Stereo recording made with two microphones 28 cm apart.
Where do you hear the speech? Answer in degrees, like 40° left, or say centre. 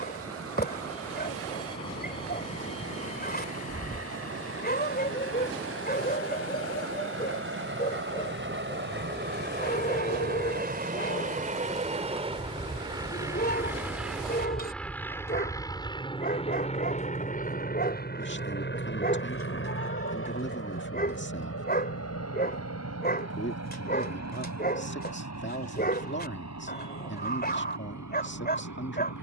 40° left.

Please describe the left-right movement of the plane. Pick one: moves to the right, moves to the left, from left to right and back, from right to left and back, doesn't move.
moves to the left.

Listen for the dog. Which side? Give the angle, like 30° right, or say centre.
30° left.